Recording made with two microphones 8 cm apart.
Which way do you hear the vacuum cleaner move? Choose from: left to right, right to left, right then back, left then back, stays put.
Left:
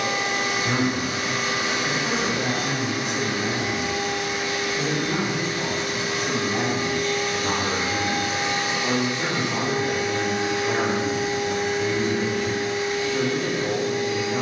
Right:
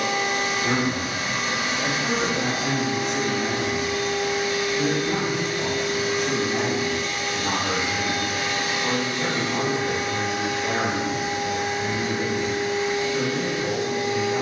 left to right.